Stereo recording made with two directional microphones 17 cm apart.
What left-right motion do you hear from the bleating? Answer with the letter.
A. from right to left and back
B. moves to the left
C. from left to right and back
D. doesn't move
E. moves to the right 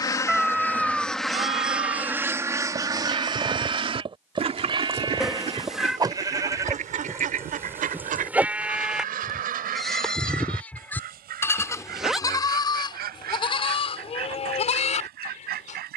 B.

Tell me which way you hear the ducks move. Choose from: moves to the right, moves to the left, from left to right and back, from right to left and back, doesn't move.
moves to the right.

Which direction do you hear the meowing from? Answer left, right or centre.
centre.